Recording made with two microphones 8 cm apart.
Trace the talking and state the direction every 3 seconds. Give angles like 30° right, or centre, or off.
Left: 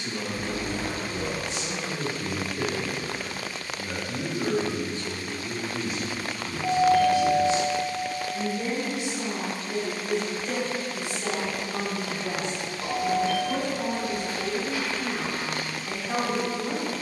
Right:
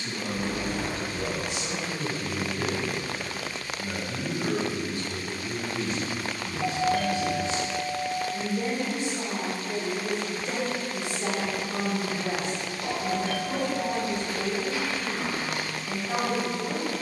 30° left, 30° left, 20° right, 30° right, 10° left, 20° left.